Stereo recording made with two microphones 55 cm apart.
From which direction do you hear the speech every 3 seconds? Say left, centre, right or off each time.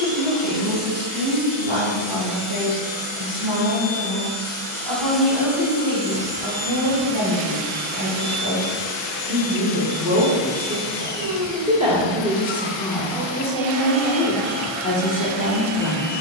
right, right, right, right, centre, left.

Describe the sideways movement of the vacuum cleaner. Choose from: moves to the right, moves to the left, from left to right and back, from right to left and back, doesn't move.
moves to the right.